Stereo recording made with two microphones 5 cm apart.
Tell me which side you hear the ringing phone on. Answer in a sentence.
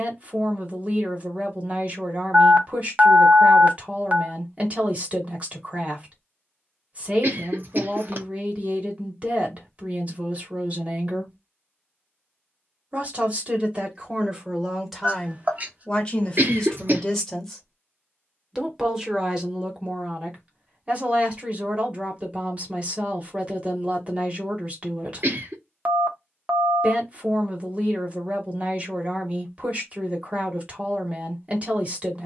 You can hear the ringing phone on the right.